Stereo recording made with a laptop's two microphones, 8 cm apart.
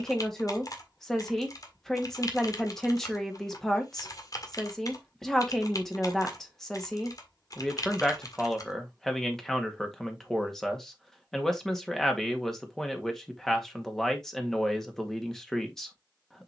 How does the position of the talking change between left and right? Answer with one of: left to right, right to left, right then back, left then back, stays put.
stays put.